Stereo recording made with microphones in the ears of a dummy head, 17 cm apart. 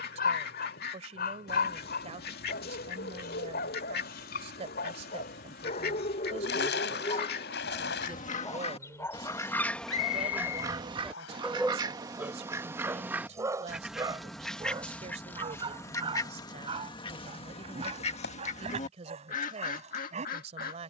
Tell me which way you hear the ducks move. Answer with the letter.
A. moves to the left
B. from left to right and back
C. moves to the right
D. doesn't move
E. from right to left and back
B.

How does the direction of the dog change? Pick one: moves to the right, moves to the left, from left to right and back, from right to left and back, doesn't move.
moves to the right.